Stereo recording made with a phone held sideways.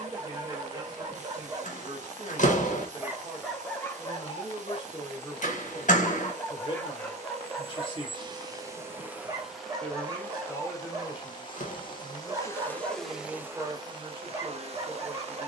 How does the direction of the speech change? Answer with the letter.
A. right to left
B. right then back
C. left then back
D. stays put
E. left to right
C.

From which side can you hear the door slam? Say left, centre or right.
left.